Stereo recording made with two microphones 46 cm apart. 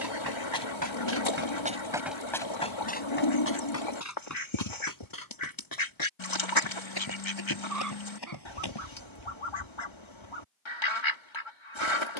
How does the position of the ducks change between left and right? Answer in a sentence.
You can hear the ducks stay in one place.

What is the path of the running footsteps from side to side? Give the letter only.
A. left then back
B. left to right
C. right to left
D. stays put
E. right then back
C.